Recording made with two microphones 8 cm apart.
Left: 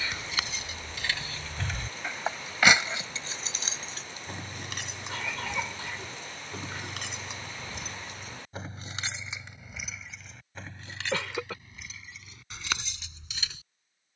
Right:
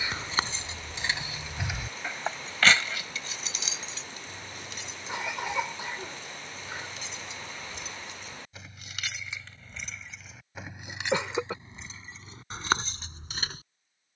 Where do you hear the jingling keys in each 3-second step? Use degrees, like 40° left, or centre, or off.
10° right, 60° left, 50° left, 10° right, 40° right.